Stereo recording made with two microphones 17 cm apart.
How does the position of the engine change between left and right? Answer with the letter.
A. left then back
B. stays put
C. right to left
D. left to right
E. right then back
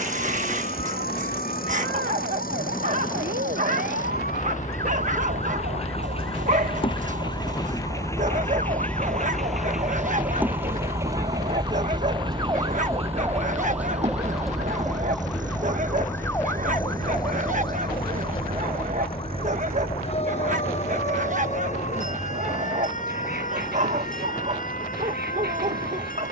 D.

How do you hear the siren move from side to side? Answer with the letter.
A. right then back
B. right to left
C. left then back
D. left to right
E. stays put
B.